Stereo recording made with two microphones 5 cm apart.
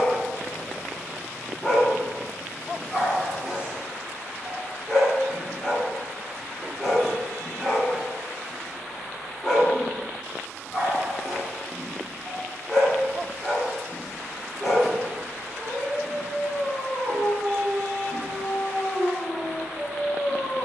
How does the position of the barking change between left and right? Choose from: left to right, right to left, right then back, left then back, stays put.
stays put.